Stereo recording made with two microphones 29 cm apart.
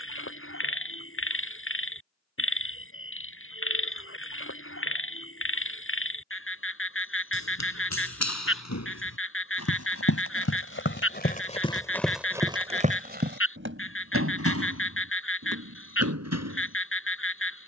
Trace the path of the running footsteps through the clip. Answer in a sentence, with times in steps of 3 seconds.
You can hear the running footsteps not at all from 0 s, on the left from 6 s and on the right from 12 s.